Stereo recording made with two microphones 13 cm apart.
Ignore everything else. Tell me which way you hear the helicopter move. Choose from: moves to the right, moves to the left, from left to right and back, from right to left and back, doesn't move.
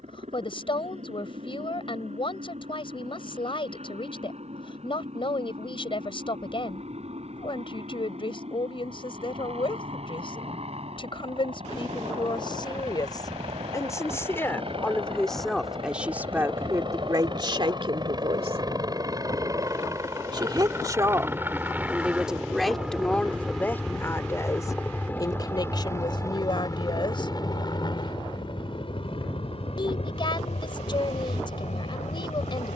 moves to the left.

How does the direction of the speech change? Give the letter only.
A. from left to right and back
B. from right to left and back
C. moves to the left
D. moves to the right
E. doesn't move
A.